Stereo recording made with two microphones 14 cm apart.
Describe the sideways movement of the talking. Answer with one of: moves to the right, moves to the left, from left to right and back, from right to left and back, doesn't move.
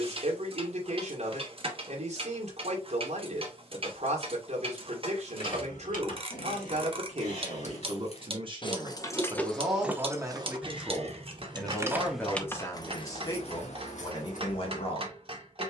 moves to the left.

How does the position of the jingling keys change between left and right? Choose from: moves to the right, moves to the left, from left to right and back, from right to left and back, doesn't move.
from left to right and back.